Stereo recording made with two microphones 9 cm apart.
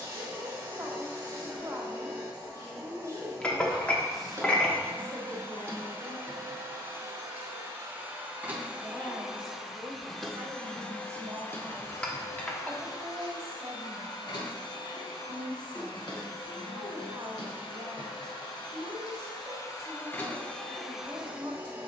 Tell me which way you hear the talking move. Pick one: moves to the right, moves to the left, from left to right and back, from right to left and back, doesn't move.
from right to left and back.